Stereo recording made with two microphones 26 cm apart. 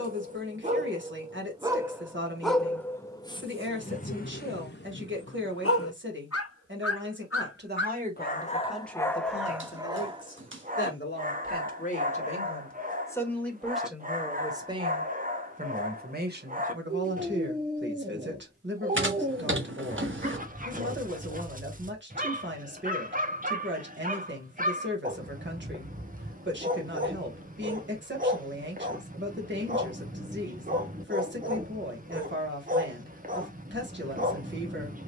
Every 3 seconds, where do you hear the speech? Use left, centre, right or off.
right, right, right, left, centre, right, right, right, right, right, right, right.